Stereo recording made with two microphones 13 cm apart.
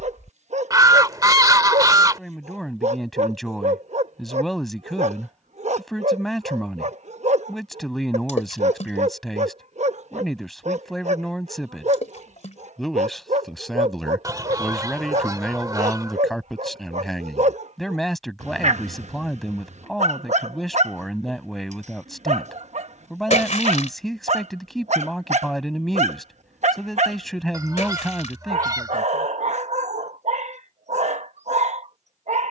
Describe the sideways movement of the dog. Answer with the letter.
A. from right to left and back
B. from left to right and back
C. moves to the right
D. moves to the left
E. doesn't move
E.